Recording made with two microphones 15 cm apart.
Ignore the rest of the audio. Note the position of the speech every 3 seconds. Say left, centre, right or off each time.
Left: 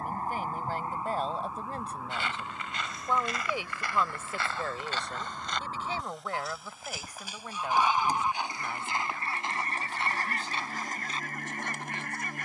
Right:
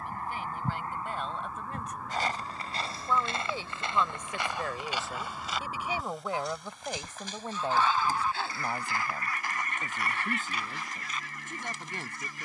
left, centre, right, right.